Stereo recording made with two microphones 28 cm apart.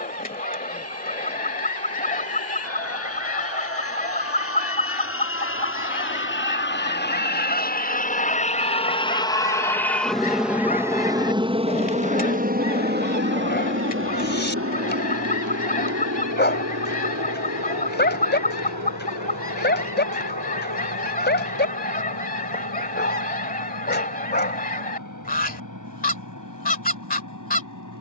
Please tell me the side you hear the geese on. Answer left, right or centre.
left.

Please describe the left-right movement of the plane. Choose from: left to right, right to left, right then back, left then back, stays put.
left to right.